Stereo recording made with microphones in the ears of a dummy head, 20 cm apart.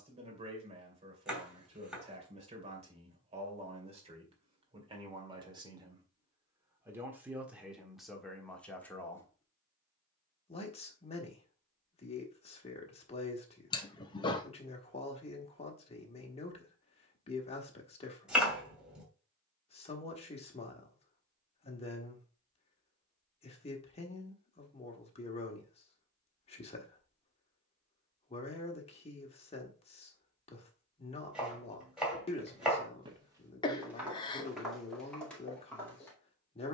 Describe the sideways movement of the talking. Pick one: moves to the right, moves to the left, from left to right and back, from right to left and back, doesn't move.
moves to the left.